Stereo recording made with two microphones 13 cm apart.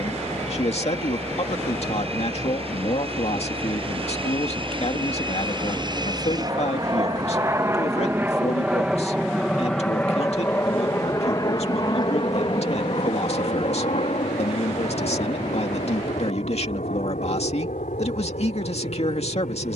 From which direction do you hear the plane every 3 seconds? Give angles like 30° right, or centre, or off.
60° right, 50° right, 20° right, 20° left, 40° left, 60° left, 70° left.